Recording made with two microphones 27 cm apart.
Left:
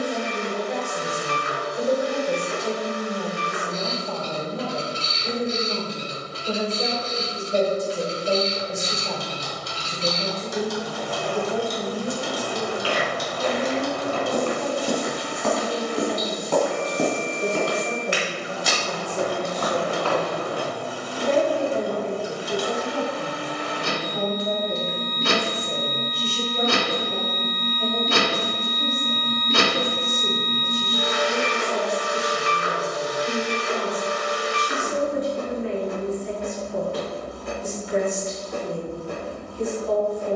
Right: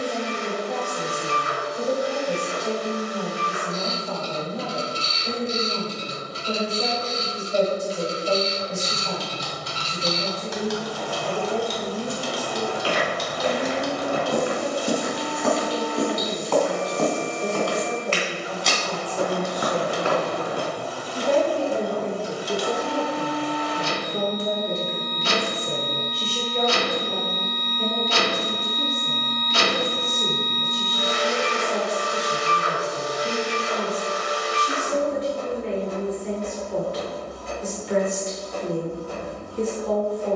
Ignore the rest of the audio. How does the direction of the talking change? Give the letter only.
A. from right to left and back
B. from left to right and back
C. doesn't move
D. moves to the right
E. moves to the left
D.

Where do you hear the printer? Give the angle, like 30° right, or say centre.
60° left.